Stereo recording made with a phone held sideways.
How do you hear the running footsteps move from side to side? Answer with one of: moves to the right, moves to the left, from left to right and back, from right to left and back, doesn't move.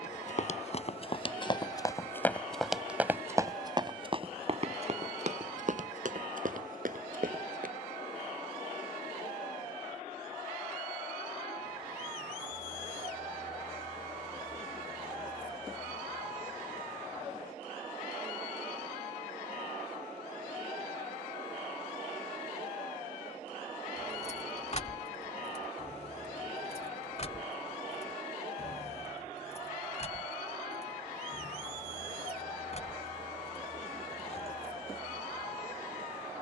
moves to the right.